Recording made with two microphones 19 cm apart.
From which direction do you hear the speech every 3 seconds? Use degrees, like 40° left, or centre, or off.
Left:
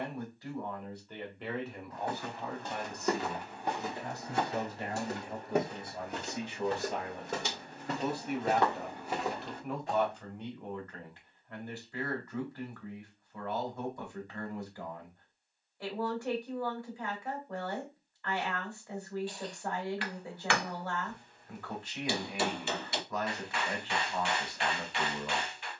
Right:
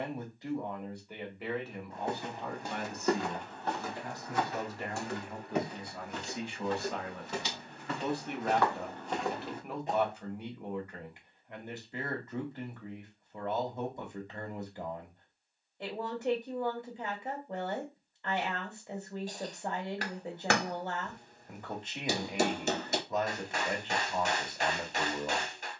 centre, 20° left, 10° left, 10° right, 20° right, 20° right, 20° right, 20° right, 20° right.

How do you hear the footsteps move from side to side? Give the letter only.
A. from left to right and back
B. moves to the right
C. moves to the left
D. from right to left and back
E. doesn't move
D.